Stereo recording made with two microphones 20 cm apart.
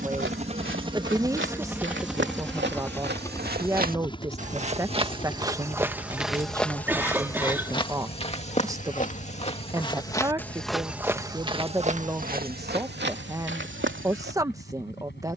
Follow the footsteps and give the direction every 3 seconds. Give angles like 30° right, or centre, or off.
70° right, 30° right, 20° left, centre, 60° right.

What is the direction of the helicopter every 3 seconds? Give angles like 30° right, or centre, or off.
10° right, 20° left, 40° left, 50° left, 50° left.